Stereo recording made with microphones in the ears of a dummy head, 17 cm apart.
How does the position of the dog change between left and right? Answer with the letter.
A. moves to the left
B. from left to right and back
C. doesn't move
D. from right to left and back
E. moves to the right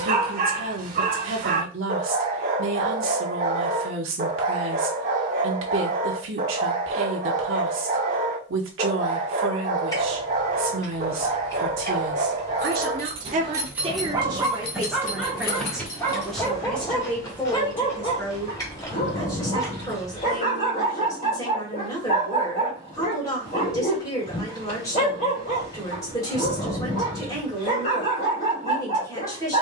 A.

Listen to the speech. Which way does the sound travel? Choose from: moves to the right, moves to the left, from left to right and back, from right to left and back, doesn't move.
moves to the left.